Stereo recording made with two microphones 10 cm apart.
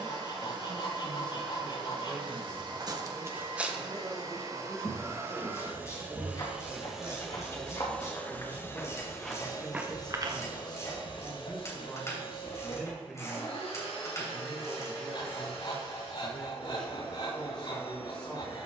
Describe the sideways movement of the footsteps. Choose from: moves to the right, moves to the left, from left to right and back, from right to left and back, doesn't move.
from right to left and back.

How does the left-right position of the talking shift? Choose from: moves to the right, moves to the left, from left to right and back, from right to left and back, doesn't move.
from left to right and back.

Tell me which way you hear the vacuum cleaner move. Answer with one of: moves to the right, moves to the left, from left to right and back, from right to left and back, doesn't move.
moves to the left.